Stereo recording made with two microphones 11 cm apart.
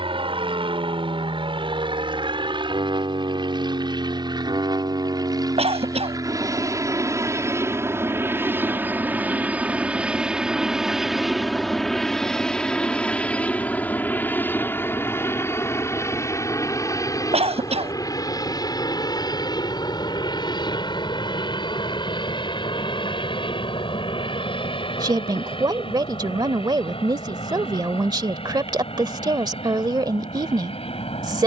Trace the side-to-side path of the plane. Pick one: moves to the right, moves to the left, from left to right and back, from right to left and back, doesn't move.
moves to the left.